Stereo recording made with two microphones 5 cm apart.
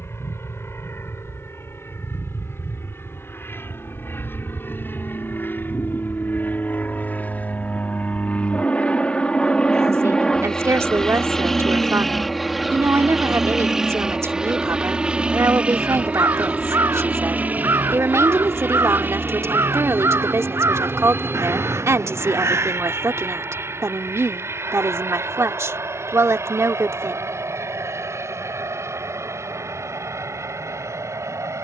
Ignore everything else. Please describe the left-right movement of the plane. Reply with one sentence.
In this clip you hear the plane move from left to right.